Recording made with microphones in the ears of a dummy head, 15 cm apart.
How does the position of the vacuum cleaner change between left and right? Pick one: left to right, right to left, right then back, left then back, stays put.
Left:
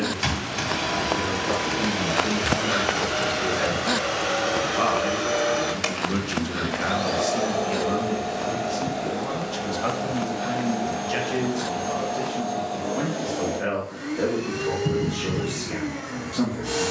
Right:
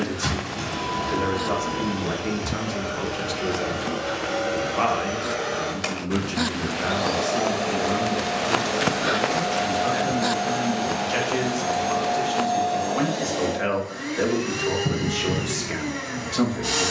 left to right.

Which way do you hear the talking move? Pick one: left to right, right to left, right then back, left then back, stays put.
left then back.